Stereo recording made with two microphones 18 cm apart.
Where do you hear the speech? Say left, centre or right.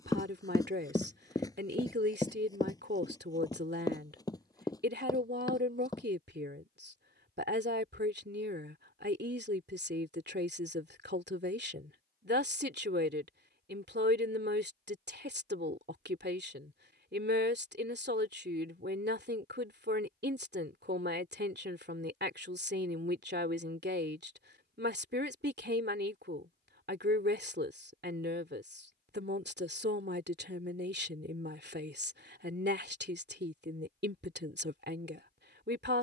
right.